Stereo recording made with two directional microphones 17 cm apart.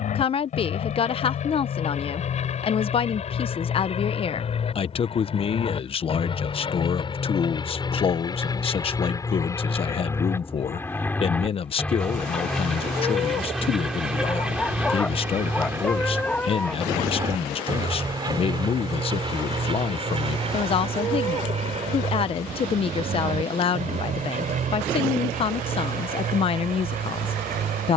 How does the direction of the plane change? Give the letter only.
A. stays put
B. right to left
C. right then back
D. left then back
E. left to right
E.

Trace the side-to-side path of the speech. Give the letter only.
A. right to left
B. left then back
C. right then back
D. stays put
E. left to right
D.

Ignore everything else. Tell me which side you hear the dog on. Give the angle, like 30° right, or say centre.
10° left.